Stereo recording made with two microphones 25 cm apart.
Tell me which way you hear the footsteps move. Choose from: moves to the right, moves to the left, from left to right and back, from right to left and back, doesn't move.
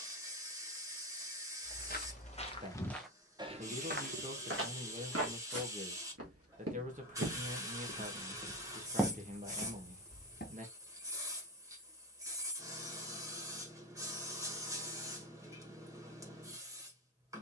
from left to right and back.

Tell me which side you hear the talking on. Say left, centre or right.
right.